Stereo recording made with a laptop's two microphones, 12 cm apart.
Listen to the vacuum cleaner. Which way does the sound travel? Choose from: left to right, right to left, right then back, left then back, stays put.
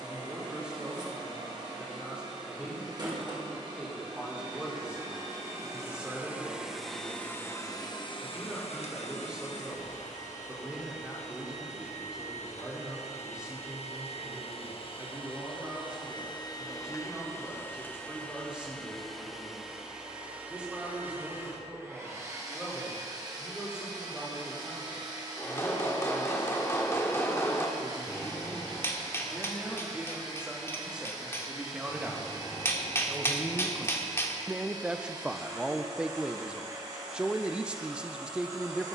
left then back.